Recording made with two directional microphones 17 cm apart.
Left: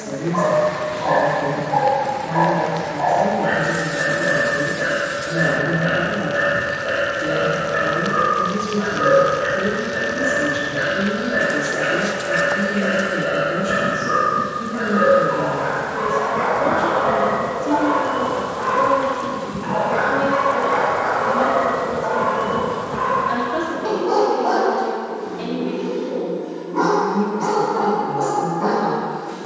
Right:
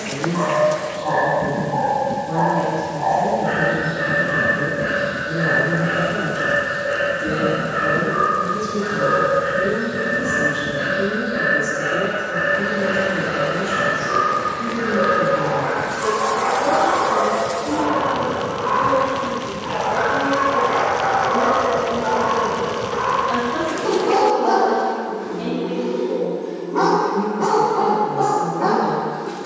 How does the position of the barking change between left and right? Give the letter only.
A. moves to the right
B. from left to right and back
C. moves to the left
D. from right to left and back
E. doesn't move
A.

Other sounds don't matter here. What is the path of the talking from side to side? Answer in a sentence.
In this clip you hear the talking stay in one place.